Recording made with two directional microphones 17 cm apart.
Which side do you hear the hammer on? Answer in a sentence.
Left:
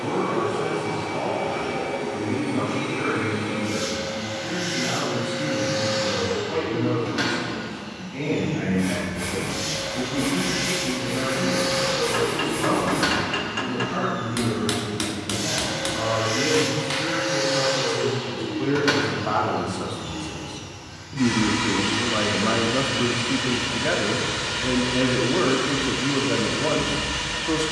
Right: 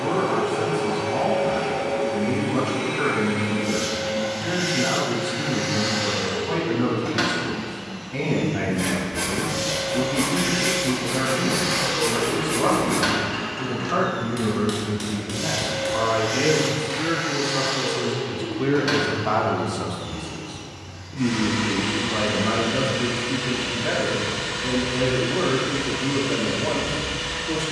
You can hear the hammer on the left.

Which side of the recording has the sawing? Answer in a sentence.
In this clip you hear the sawing on the right.